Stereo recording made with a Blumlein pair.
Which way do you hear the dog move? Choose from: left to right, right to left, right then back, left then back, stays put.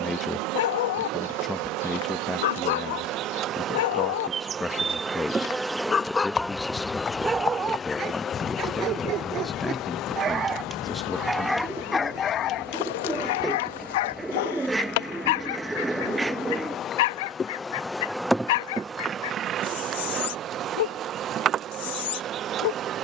right then back.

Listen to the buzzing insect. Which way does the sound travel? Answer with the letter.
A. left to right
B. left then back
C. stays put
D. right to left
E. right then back
B.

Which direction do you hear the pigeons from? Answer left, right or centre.
centre.